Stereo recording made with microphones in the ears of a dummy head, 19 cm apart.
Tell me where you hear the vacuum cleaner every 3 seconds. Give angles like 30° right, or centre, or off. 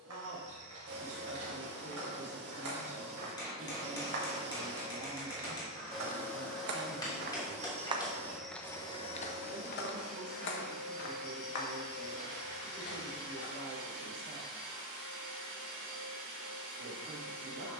60° right, 30° right, 10° right, 40° right, 60° right, 60° right.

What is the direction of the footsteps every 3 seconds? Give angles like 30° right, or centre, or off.
80° right, 70° right, 30° right, 60° left, 70° left, off.